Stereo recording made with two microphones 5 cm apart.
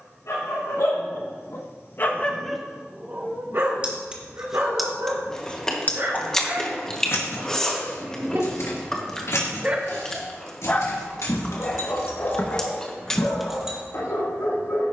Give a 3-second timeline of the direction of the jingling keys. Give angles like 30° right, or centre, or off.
off, centre, 60° left, 70° left, 20° left.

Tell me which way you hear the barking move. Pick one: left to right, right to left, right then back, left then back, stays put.
right then back.